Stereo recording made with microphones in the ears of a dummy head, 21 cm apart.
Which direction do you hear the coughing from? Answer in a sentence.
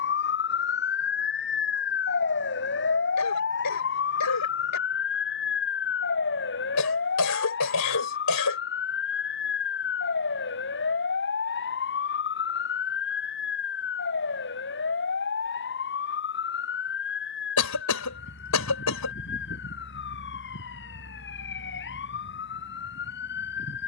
In this clip you hear the coughing on the left.